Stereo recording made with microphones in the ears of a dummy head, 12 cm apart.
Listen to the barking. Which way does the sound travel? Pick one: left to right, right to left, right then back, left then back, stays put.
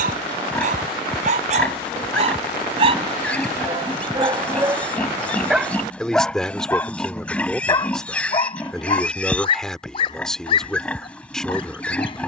right to left.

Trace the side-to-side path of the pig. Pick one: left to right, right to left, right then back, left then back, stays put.
stays put.